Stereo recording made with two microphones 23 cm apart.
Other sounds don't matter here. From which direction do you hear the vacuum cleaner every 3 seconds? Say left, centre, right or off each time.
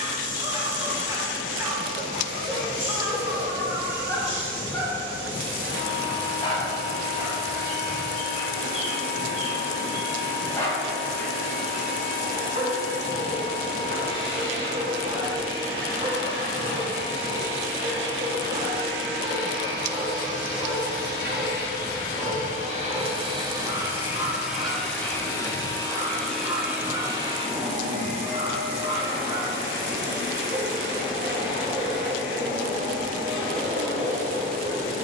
right, right, right, right, right, right, right, right, centre, right, right, right.